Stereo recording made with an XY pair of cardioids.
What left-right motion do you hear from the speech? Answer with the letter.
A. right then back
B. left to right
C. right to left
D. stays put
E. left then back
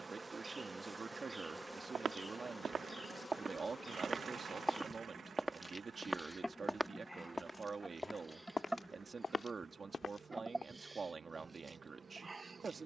D.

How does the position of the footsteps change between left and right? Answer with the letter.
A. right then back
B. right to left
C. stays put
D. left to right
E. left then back
B.